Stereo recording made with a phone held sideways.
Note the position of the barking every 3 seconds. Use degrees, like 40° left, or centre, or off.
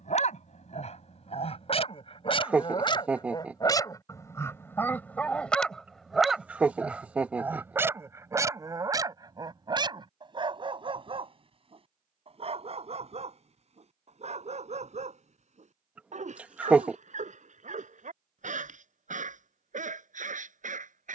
40° left, 20° left, 10° right, 30° right, 50° right, 50° right, 60° right.